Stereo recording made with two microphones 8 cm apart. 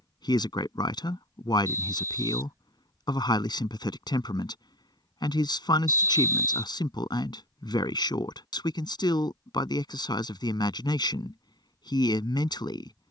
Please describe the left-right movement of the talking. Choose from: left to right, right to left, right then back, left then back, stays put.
stays put.